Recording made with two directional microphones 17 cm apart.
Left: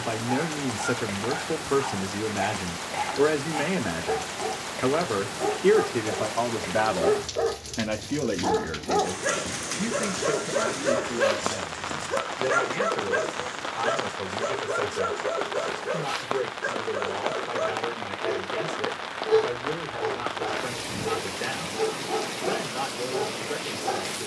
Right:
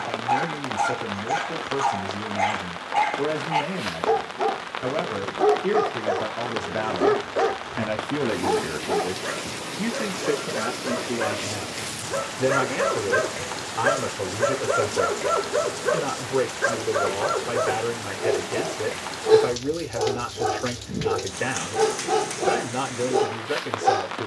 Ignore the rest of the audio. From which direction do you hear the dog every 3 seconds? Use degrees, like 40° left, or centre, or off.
70° right, 70° right, 30° right, 20° left, 20° right, 60° right, 70° right, 70° right.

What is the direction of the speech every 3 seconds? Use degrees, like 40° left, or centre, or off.
30° left, 30° left, 10° left, 30° right, 40° right, 40° right, 40° right, 40° right.